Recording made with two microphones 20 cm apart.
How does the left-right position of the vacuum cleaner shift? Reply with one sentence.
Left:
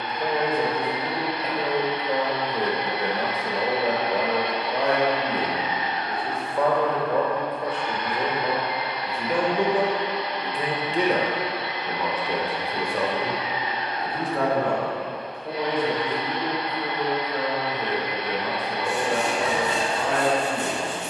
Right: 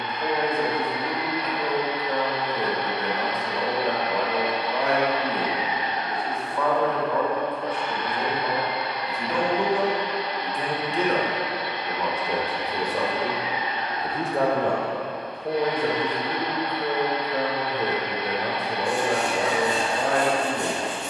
You can hear the vacuum cleaner move from left to right.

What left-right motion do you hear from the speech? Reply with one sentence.
You can hear the speech move from left to right.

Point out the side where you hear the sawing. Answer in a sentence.
You can hear the sawing on the left.